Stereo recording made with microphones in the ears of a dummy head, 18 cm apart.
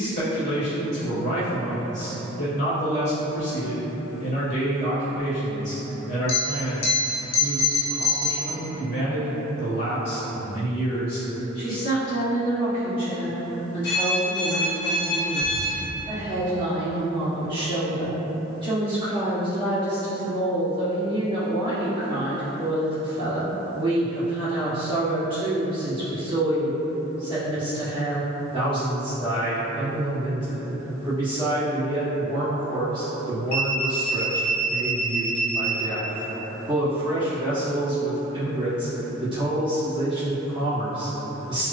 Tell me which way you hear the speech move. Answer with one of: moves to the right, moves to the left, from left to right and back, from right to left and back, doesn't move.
moves to the right.